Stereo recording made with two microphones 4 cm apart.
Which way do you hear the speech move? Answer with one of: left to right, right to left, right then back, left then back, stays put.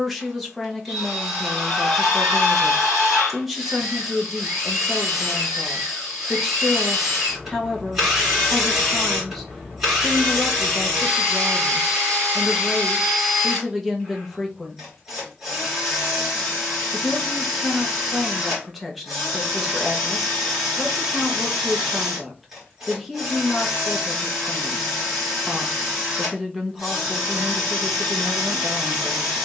stays put.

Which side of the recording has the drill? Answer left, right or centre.
centre.